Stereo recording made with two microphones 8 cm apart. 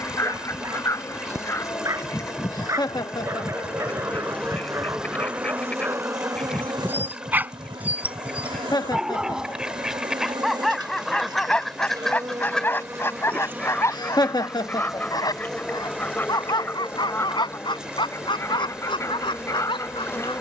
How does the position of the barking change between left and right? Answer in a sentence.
You can hear the barking travel towards the left.